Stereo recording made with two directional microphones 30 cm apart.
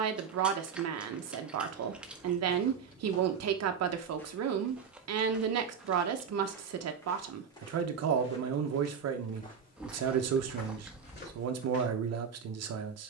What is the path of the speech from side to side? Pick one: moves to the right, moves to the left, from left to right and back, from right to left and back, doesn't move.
doesn't move.